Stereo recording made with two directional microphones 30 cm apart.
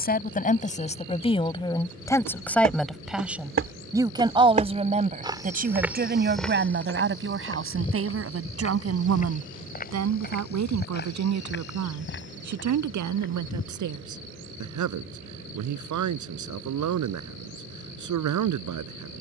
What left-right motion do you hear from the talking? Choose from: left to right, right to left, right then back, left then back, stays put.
left to right.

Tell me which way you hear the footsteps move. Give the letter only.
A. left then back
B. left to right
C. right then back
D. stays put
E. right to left
E.